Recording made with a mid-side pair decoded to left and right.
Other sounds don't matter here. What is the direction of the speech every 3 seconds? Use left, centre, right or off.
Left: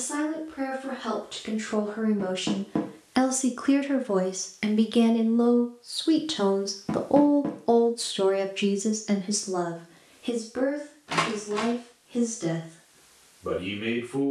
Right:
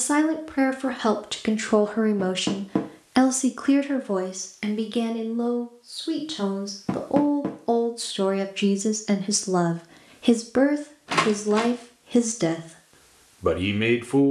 right, centre, centre, right, right.